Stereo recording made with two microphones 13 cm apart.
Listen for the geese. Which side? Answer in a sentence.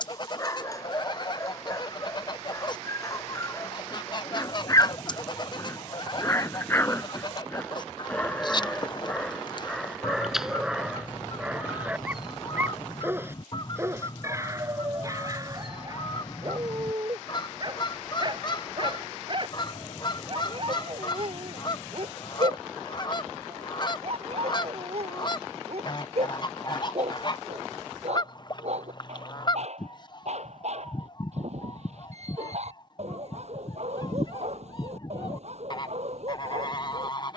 You can hear the geese on the left.